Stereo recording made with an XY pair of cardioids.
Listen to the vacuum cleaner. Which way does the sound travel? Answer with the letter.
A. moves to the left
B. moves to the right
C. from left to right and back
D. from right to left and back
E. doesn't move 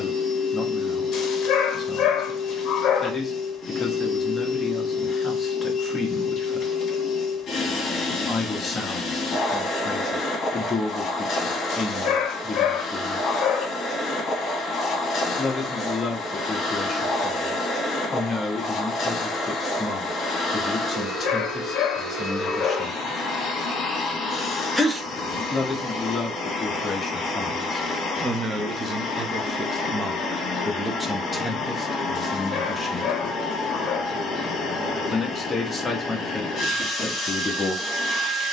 E.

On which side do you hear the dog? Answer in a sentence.
In this clip you hear the dog on the left.